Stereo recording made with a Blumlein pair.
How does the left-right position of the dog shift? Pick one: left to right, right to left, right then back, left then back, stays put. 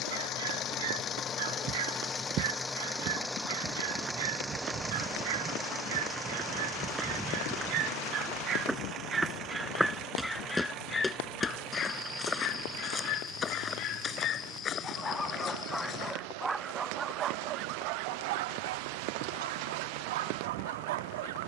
left then back.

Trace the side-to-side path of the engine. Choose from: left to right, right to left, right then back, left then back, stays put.
left to right.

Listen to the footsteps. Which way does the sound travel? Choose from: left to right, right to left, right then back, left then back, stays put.
right to left.